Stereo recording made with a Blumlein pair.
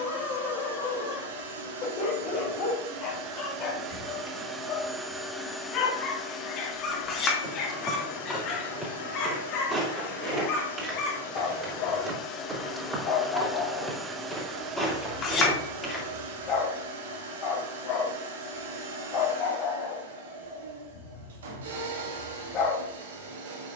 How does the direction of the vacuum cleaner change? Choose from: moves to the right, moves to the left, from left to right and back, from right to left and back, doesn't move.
from right to left and back.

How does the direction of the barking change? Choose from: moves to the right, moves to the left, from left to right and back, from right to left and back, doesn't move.
doesn't move.